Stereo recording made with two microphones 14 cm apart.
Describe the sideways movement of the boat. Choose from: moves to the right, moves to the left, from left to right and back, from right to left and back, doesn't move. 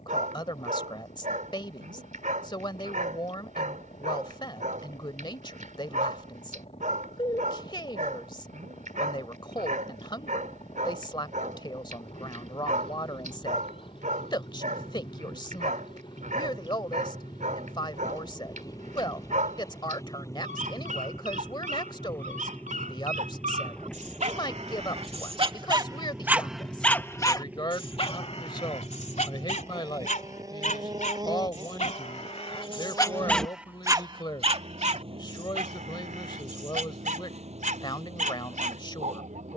moves to the right.